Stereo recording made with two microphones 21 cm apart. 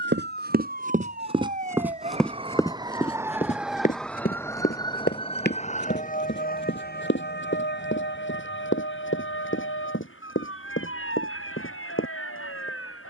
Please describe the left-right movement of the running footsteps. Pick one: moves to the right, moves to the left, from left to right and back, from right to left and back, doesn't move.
moves to the left.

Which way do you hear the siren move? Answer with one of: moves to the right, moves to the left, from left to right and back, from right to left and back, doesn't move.
moves to the left.